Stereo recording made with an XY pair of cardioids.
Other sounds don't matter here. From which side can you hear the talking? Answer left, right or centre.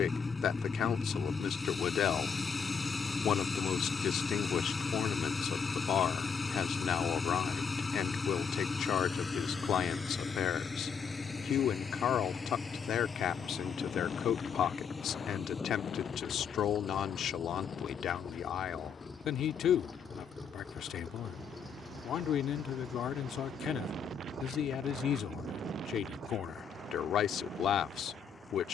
left.